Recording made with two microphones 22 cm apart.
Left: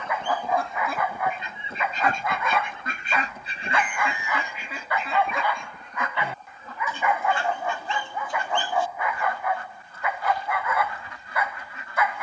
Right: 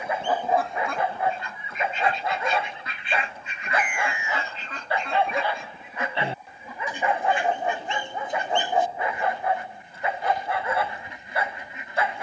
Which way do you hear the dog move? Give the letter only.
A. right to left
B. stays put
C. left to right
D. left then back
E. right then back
B.